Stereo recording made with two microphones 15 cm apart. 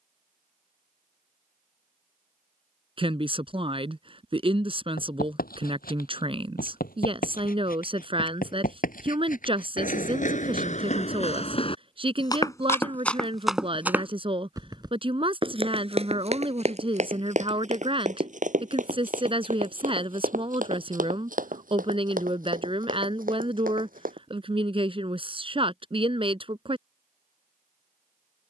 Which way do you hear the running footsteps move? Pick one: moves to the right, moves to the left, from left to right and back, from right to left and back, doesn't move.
moves to the right.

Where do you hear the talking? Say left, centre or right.
right.